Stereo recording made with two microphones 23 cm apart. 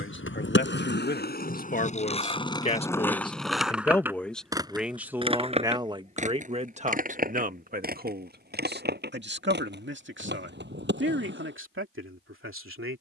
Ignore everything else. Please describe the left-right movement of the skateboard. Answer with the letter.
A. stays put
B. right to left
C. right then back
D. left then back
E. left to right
E.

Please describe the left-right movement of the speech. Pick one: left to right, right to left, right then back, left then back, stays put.
left to right.